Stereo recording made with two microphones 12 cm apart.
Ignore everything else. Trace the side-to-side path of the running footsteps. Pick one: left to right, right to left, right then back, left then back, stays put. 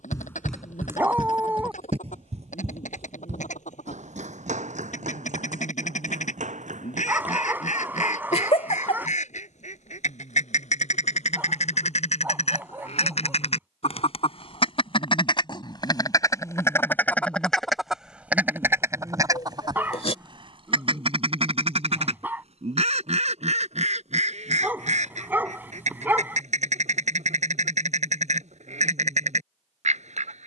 left to right.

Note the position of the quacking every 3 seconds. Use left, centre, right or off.
left, left, left, left, left, left, right, right, right, right.